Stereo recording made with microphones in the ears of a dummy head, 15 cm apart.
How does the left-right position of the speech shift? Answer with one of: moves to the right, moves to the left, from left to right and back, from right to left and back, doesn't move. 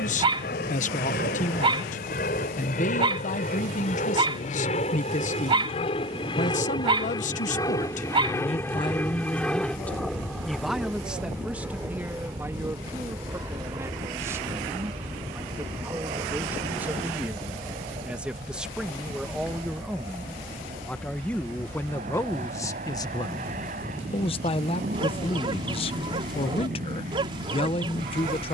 from left to right and back.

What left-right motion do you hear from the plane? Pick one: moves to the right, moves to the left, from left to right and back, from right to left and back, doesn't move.
moves to the right.